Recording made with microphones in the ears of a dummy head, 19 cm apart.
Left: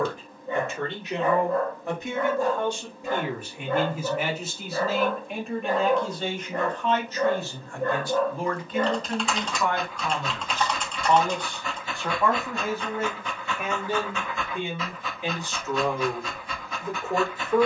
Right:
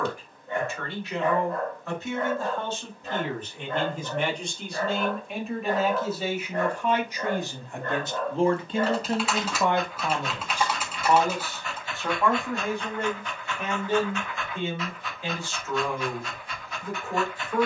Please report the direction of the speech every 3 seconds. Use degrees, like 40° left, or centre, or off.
20° left, centre, 20° right, 20° right, 10° left, 20° left.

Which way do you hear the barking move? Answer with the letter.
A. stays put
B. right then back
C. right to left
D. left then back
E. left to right
A.